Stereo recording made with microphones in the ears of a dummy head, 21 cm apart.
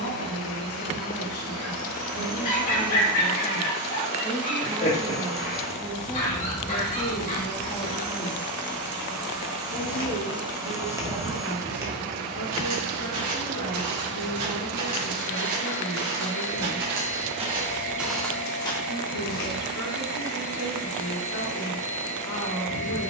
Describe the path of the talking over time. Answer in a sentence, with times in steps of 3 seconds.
In this clip you hear the talking on the left from 0 s, in the centre from 3 s and on the left from 6 s.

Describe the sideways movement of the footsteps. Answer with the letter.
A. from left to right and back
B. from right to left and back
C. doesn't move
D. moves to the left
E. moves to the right
A.